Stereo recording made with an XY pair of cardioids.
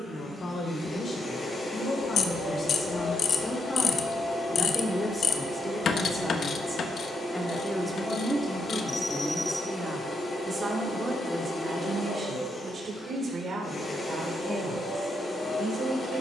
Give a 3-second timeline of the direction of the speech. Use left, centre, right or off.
left, left, centre, right, right, right.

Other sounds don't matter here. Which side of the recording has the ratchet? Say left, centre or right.
left.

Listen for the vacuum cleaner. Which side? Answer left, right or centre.
left.